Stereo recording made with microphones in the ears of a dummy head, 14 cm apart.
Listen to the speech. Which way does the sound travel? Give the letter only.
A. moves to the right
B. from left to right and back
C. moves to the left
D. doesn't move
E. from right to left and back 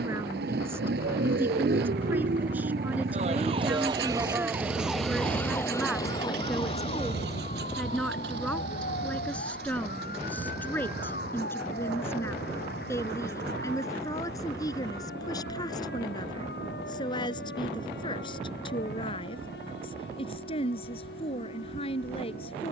C.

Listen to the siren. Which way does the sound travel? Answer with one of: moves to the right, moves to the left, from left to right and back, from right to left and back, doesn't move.
moves to the left.